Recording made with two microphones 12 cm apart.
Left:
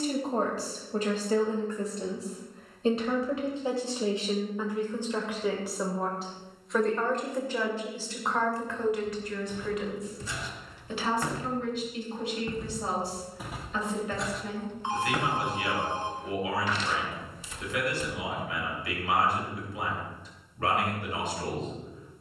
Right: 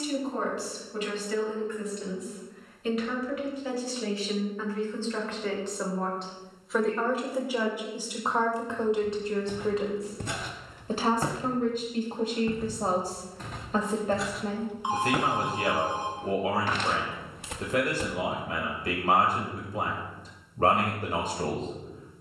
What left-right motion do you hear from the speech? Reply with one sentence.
In this clip you hear the speech travel towards the right.